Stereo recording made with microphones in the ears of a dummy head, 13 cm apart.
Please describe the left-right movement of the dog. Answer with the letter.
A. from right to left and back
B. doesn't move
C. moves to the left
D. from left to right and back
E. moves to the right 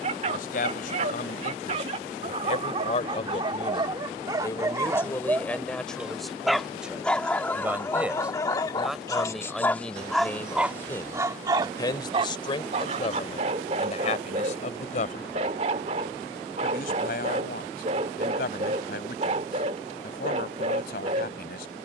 A.